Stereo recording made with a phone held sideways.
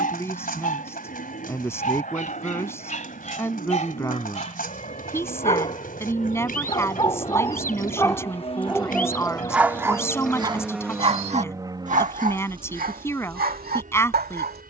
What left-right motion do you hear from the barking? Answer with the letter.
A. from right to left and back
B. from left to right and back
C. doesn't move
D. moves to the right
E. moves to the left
D.